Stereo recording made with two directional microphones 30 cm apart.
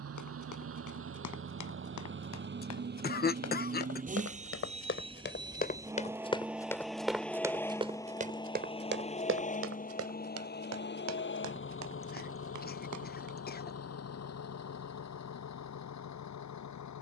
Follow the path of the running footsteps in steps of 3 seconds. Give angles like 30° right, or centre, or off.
60° left, 40° left, 10° right, 50° right, 70° right, off.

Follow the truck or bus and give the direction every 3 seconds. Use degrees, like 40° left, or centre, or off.
40° right, 20° right, 10° left, 30° left, 50° left, 60° left.